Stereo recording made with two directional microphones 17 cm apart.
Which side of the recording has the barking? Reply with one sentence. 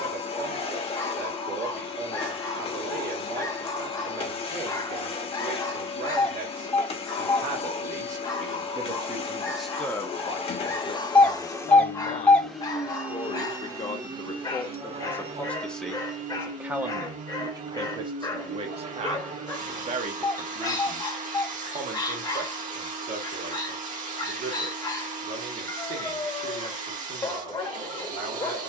You can hear the barking on the left.